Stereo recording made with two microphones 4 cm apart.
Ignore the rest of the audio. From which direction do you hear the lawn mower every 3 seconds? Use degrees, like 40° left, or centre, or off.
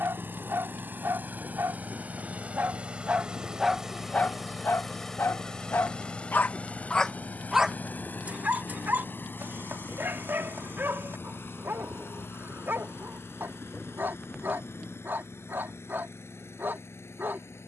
40° right, centre, 40° left, 60° left, 70° left, 80° left.